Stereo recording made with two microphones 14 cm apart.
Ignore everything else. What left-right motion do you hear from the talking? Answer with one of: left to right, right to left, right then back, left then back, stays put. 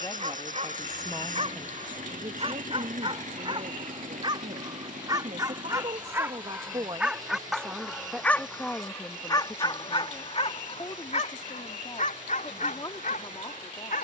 right then back.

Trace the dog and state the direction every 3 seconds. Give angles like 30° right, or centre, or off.
50° right, 30° right, centre, 40° left, 70° left.